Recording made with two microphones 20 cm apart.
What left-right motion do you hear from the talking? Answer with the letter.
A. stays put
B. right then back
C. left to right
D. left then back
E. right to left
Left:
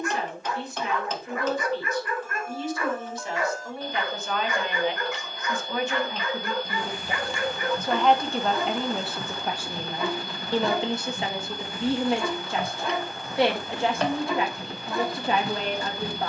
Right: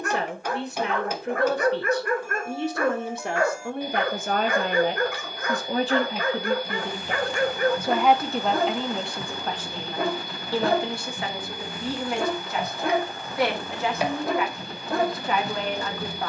E.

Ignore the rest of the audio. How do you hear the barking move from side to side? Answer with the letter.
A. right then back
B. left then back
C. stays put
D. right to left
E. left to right
C.